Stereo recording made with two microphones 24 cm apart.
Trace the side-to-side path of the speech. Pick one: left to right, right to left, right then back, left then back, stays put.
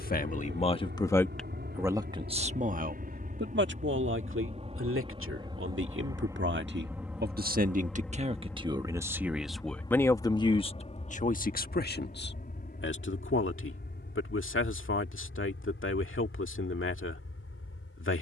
right then back.